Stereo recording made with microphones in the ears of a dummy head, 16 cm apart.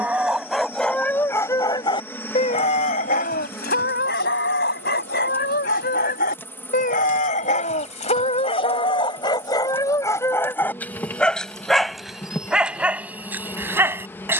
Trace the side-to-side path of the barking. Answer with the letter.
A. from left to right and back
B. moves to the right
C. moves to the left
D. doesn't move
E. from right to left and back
E.